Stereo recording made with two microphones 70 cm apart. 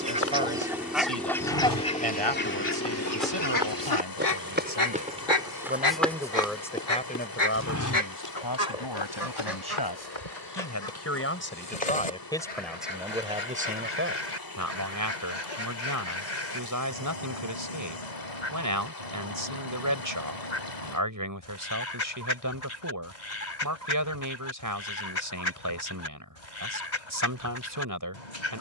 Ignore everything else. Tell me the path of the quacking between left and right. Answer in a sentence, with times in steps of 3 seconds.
You can hear the quacking in the centre from 0 s and on the left from 3 s.